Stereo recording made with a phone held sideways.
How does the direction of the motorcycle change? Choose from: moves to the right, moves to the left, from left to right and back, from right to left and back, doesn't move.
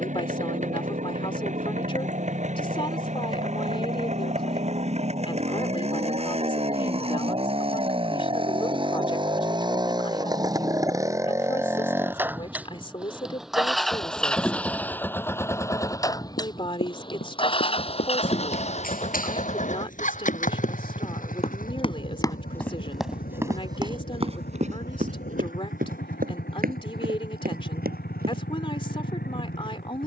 moves to the left.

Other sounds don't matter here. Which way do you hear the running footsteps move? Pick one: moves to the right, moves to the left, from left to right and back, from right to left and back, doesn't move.
moves to the right.